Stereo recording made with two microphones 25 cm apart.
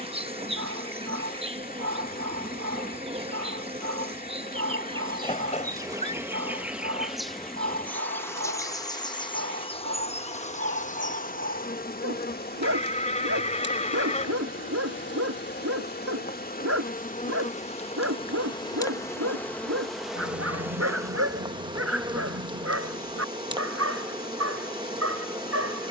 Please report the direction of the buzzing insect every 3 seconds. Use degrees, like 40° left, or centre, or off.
20° right, 20° right, centre, 30° left, 50° left, 40° left, 10° left, 20° right, 20° right.